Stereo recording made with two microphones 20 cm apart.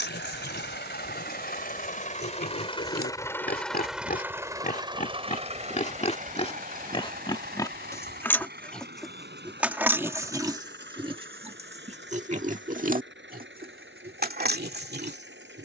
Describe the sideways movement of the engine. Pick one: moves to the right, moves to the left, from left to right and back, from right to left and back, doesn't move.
moves to the right.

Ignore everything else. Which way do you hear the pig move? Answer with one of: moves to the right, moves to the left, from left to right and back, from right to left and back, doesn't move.
moves to the right.